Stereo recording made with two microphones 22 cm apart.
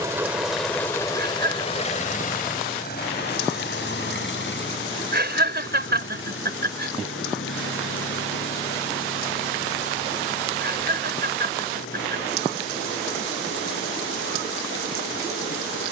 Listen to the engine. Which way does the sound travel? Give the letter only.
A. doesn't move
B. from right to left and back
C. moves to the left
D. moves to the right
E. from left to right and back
C.